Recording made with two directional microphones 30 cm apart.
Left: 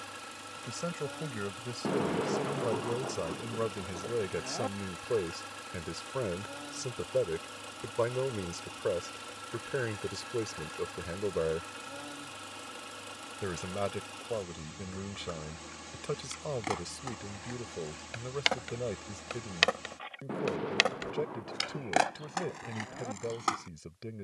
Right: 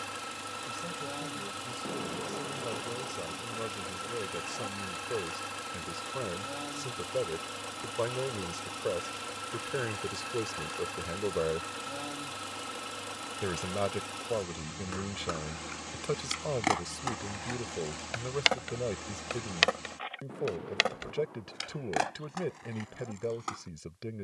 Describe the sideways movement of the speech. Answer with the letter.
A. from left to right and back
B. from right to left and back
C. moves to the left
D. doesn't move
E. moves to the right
E.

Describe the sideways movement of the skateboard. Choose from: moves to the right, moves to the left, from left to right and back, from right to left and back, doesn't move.
moves to the left.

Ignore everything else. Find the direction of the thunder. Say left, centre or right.
left.